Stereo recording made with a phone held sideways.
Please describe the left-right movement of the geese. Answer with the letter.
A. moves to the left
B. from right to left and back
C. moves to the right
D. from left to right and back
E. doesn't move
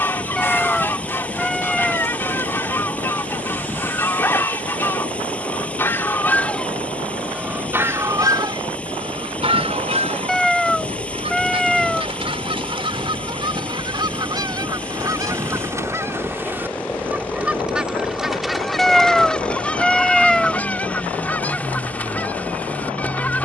D.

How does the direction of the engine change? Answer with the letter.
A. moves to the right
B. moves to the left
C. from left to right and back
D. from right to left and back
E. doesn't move
E.